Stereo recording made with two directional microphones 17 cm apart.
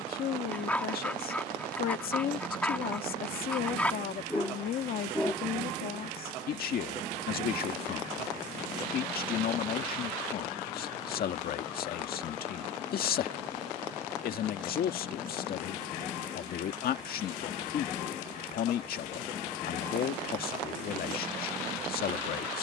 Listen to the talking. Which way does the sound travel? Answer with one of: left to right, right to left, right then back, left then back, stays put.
stays put.